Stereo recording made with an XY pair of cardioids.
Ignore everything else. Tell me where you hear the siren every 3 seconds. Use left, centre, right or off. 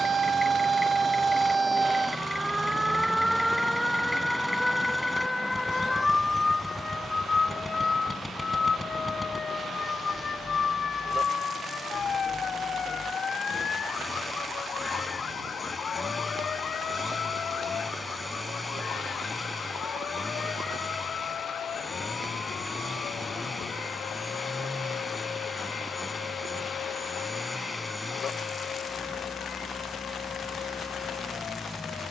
right, centre, left, left, left, left, left, left, left, left, left.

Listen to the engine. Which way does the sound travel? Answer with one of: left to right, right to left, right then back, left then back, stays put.
stays put.